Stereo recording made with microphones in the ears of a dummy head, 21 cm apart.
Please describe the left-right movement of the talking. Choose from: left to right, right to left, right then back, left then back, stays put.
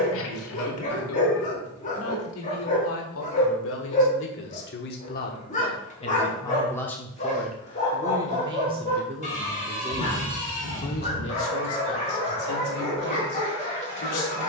right then back.